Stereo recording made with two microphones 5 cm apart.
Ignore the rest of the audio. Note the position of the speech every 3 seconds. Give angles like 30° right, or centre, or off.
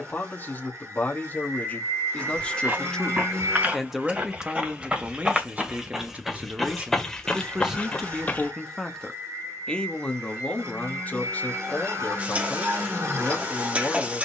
30° left, 20° right, 10° right, 30° left, 40° left.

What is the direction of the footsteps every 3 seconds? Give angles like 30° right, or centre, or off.
40° right, 30° right, 10° left, off, off.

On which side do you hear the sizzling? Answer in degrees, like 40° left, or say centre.
30° right.